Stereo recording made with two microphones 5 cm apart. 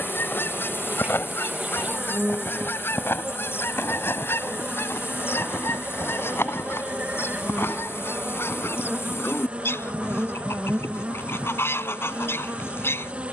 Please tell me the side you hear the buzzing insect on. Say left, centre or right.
right.